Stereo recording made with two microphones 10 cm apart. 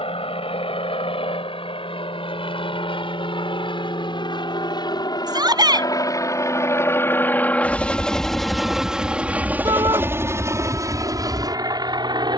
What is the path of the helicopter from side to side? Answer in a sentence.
You can hear the helicopter move from left to right.